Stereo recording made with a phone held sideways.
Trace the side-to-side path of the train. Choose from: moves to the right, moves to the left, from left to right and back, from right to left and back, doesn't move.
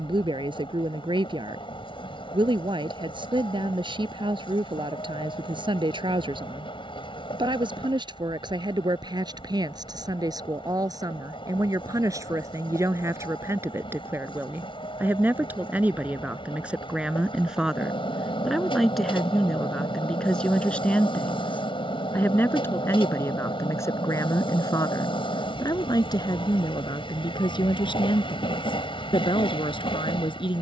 doesn't move.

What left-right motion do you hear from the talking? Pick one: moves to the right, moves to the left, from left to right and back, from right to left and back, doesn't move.
moves to the left.